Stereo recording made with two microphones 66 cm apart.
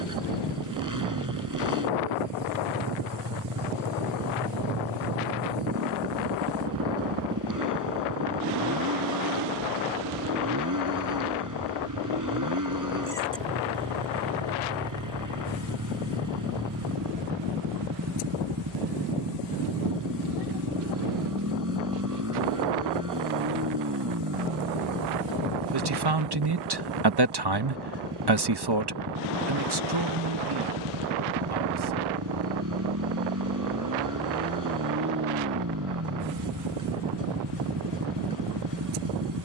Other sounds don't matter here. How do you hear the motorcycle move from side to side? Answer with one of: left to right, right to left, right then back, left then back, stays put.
stays put.